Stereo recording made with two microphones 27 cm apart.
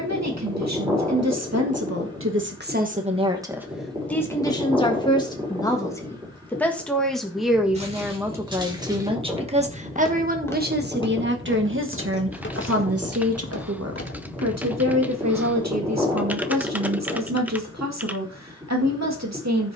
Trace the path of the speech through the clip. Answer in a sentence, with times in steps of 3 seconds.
In this clip you hear the speech on the right from 0 s, in the centre from 3 s and on the right from 9 s.